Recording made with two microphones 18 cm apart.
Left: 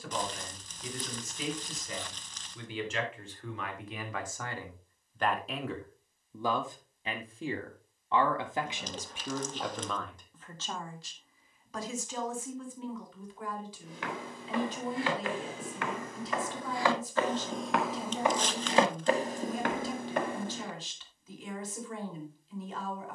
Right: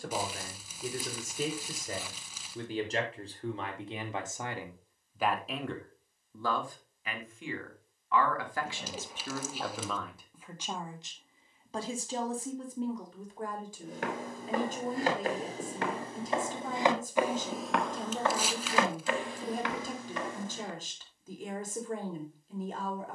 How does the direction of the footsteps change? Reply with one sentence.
You can hear the footsteps move from right to left.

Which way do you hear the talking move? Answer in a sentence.
You can hear the talking move from right to left and back again.